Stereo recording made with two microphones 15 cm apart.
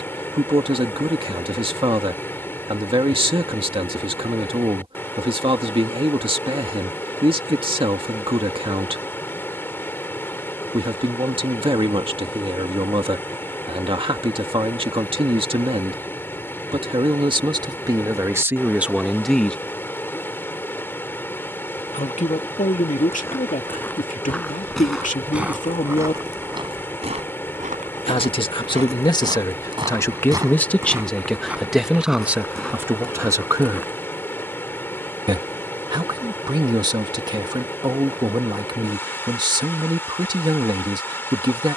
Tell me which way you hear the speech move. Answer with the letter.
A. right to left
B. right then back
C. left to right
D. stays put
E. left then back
E.